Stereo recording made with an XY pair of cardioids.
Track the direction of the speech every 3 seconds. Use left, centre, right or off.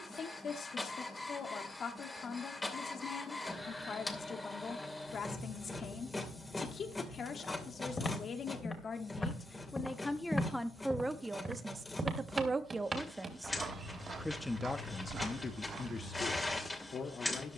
left, left, left, centre, centre, left.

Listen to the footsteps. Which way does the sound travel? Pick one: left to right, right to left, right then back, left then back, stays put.
left to right.